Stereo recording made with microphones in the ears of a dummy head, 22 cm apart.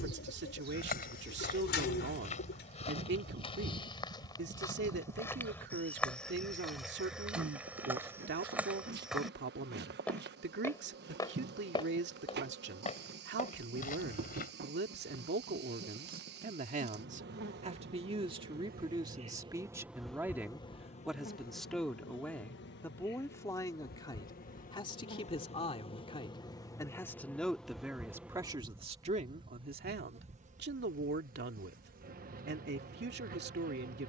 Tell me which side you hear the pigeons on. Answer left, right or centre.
left.